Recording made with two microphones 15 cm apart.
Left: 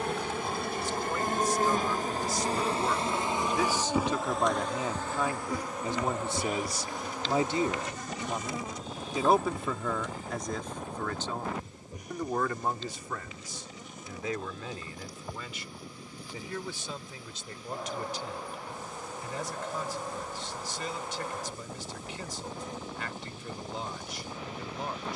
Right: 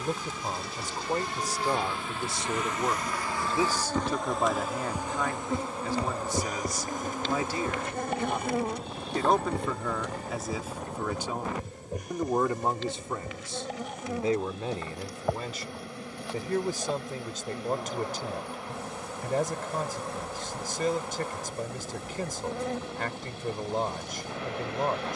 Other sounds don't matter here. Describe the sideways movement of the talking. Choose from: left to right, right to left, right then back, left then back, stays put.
left then back.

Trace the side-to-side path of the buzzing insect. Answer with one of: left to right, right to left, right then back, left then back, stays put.
left to right.